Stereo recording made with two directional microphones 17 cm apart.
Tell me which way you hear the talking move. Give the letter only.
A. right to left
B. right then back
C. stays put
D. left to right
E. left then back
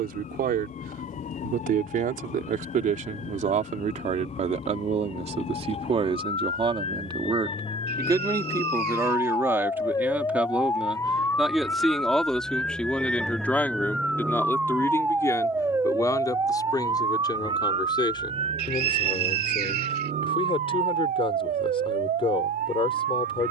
A.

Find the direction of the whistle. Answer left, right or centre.
right.